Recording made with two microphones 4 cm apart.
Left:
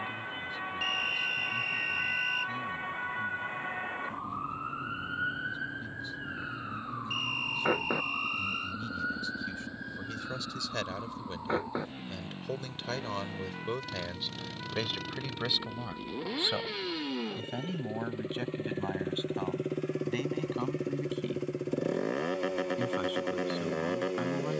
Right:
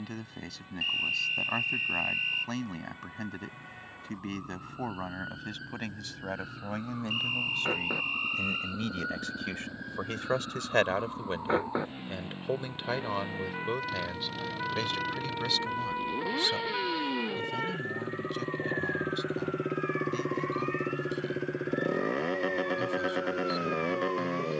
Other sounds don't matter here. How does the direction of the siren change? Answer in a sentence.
In this clip you hear the siren move to the right.